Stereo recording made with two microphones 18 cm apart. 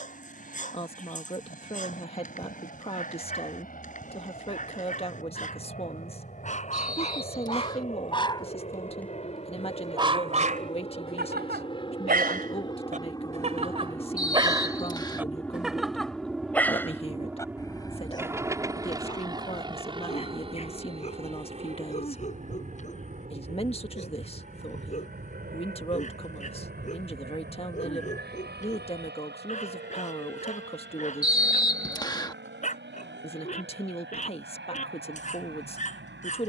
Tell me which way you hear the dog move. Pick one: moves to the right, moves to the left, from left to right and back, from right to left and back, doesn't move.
from left to right and back.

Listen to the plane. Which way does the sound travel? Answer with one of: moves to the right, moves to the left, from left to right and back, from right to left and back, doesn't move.
moves to the right.